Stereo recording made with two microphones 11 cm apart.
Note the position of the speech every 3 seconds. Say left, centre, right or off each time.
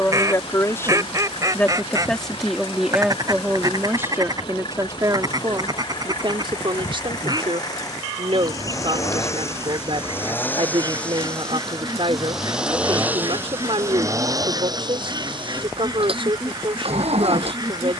centre, right, right, right, right, right.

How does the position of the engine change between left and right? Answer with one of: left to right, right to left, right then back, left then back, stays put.
left to right.